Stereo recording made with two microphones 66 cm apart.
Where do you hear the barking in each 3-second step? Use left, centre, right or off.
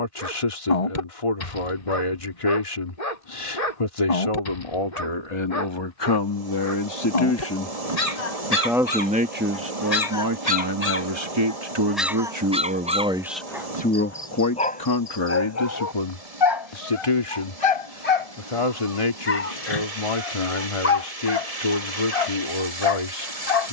left, left, left, left, centre, left, left, left.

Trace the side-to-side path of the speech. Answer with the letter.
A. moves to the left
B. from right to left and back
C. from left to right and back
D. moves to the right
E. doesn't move
C.